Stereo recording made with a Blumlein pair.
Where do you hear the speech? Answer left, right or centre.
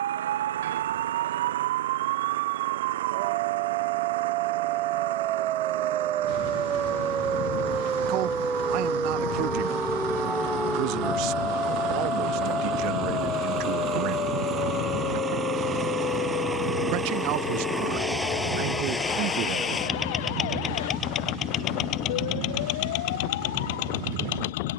right.